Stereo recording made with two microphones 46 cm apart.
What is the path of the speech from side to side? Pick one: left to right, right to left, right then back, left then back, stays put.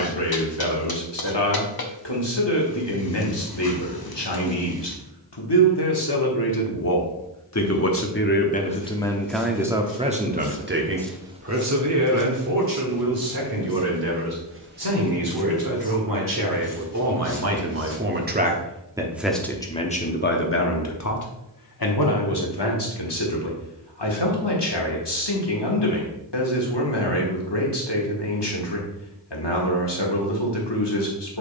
right then back.